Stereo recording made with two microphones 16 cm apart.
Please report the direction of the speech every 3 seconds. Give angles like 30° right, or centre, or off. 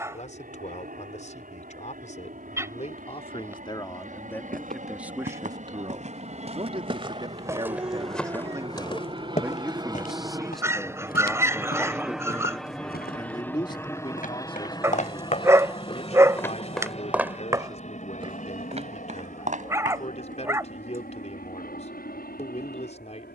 50° left, 10° left, 30° right, centre, 30° left, 40° left, 40° left, 40° left.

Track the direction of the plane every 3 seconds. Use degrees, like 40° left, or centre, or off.
70° right, 60° right, 40° right, 20° right, 10° left, 40° left, 50° left, 60° left.